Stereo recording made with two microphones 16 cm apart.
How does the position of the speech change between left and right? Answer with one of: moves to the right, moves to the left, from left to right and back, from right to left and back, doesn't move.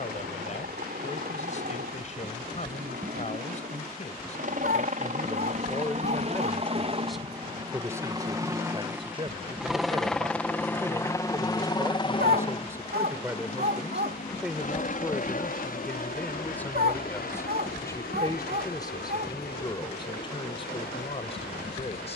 from left to right and back.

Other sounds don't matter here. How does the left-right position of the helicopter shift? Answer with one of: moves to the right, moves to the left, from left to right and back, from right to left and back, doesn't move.
moves to the left.